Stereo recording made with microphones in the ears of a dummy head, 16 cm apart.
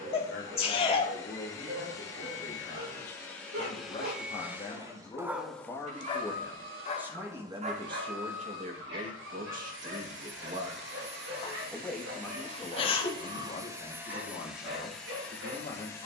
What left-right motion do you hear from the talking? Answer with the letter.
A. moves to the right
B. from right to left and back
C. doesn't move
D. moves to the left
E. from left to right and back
E.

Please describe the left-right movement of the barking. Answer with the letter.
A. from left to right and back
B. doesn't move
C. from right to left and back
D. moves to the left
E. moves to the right
C.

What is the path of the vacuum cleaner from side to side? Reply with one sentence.
You can hear the vacuum cleaner go right and come back.